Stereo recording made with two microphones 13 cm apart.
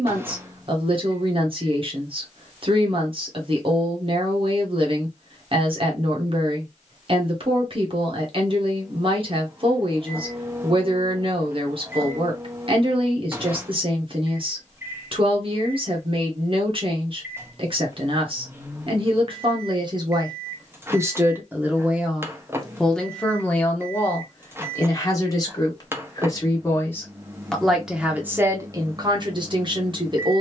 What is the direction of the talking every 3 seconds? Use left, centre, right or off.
right, right, right, right, right, right, right, centre, left, right.